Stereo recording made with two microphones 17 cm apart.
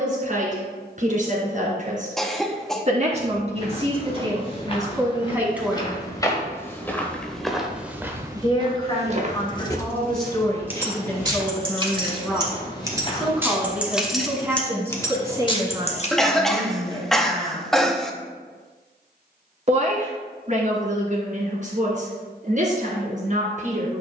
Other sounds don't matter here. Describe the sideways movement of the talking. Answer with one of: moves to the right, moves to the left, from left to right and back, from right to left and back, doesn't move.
from right to left and back.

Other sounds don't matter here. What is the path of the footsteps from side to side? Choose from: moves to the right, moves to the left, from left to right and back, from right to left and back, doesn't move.
from left to right and back.